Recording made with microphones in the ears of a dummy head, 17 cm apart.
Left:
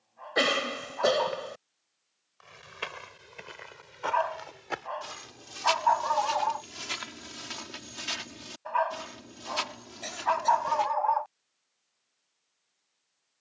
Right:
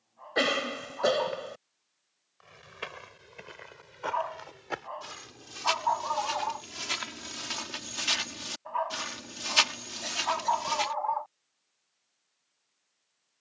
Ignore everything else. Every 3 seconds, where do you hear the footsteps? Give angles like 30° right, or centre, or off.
20° left, 10° left, 20° right, 60° right, off.